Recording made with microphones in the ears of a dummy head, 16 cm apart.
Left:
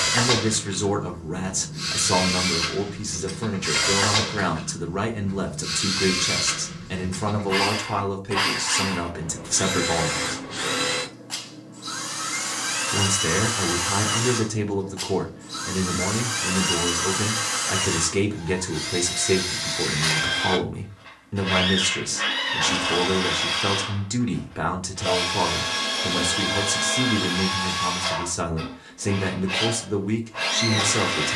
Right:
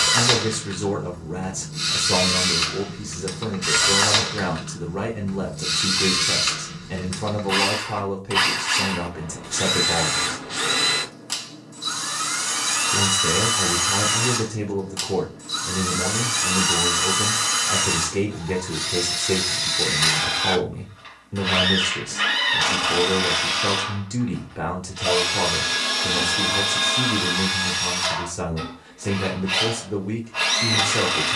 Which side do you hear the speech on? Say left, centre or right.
left.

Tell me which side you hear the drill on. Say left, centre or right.
right.